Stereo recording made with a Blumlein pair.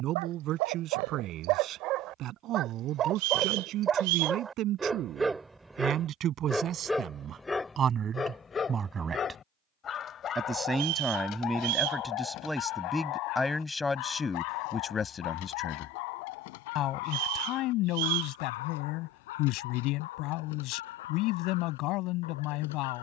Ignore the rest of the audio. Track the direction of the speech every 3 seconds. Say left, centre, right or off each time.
right, right, right, centre, centre, left, left, left.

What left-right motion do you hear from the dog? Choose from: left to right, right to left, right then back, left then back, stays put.
right to left.